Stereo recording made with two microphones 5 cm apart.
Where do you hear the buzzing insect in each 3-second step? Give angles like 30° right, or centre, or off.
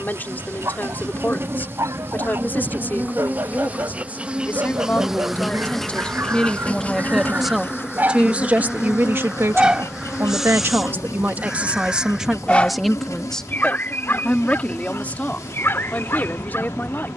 40° right, 10° right, 40° left, 70° left, 80° left, 80° left.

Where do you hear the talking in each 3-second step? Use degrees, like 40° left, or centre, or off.
30° left, 30° left, 10° right, 40° right, 10° left, 30° left.